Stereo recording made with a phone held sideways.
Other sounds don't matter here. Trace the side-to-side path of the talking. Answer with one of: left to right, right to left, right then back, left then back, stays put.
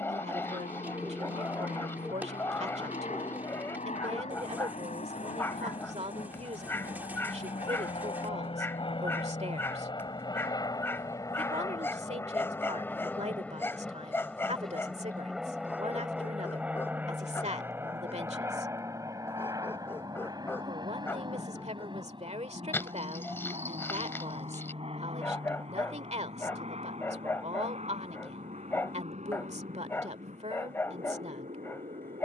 stays put.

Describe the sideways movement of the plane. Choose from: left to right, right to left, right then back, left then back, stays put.
left to right.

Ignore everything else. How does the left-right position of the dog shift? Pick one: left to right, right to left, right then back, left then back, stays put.
stays put.